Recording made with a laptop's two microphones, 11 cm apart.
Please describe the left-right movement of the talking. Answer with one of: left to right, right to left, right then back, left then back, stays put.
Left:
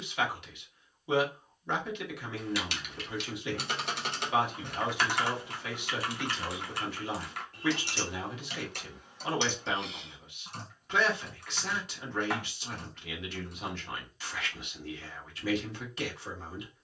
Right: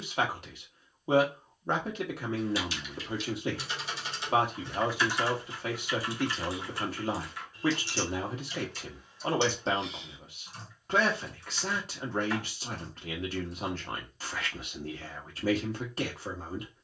stays put.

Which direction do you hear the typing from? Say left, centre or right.
left.